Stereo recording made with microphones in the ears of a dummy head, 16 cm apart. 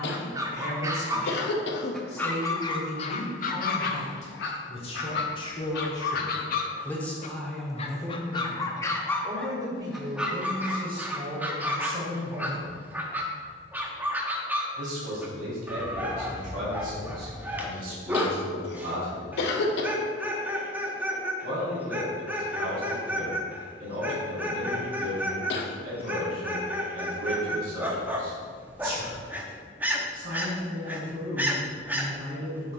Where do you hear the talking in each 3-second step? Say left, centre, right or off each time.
left, left, centre, right, right, right, right, right, right, right, right.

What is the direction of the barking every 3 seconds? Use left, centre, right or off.
centre, left, left, centre, centre, centre, centre, centre, centre, centre, centre.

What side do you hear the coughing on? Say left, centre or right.
left.